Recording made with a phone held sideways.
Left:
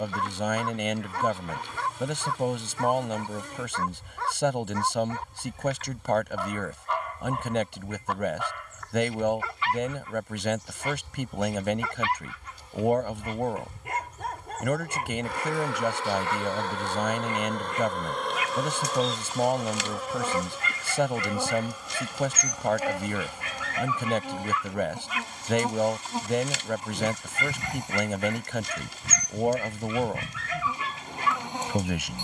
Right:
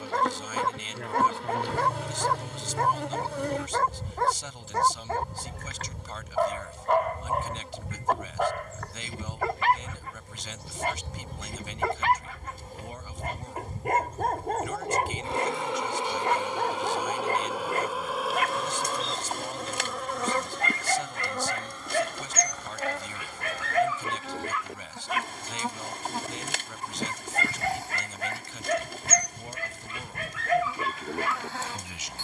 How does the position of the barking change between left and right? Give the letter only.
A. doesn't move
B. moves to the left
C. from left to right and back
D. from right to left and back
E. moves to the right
A.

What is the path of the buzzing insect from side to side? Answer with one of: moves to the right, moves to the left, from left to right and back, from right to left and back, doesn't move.
moves to the left.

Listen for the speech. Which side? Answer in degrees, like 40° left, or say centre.
70° left.